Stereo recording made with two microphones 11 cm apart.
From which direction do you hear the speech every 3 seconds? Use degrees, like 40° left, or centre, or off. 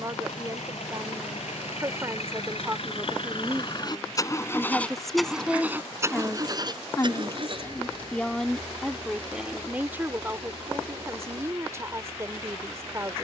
30° right, centre, 20° left, 20° right, 30° right.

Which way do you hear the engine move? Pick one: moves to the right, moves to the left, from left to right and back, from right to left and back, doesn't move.
moves to the right.